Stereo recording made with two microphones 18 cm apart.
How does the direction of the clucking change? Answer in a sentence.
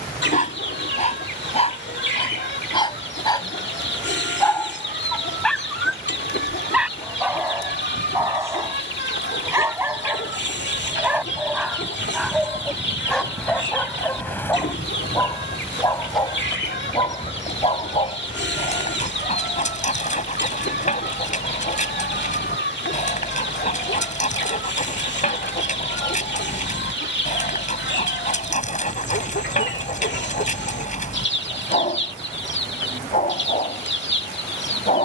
You can hear the clucking stay put.